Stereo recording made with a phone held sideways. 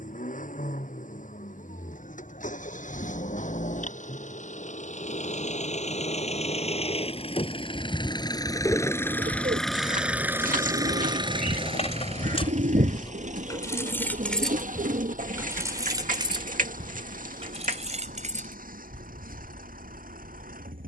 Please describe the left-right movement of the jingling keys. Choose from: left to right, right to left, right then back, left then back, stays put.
left to right.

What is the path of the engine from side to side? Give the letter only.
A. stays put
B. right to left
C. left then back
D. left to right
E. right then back
D.